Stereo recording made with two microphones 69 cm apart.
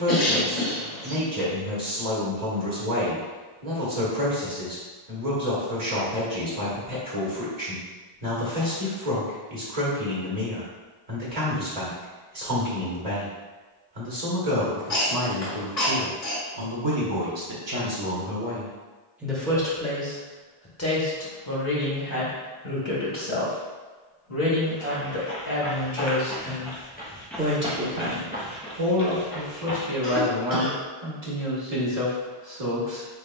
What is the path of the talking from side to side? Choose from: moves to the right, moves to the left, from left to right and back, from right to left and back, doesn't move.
from right to left and back.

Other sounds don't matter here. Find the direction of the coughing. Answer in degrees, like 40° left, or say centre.
60° left.